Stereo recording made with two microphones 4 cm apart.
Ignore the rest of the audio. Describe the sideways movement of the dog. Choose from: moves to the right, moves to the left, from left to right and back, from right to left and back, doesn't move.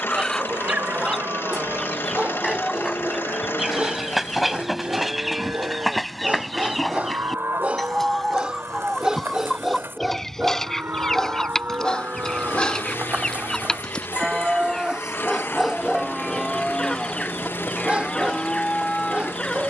from right to left and back.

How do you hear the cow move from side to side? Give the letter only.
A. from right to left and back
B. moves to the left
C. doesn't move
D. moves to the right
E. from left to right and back
B.